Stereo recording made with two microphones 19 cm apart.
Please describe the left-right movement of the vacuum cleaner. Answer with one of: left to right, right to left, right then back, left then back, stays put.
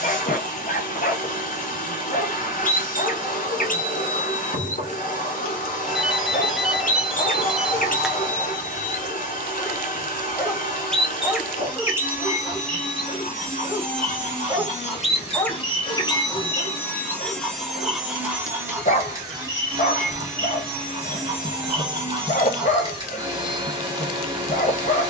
left to right.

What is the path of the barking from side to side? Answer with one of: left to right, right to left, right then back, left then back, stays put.
right then back.